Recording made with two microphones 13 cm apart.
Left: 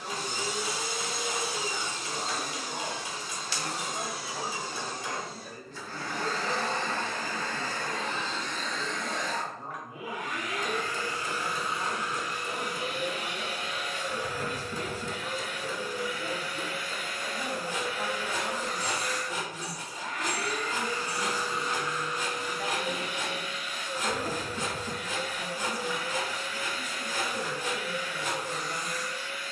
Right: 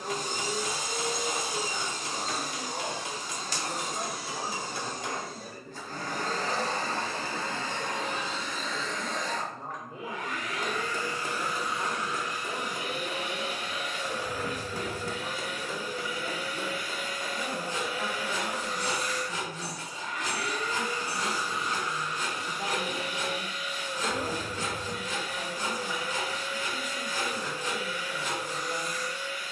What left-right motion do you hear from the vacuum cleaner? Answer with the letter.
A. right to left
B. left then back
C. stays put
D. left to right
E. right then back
A.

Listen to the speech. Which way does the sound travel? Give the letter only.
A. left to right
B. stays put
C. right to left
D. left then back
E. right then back
D.